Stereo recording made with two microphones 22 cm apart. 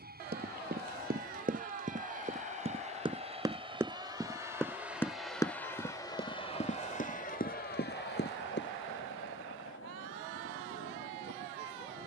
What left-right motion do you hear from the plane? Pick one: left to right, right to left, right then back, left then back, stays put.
right to left.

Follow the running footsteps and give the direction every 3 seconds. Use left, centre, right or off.
right, centre, left, off.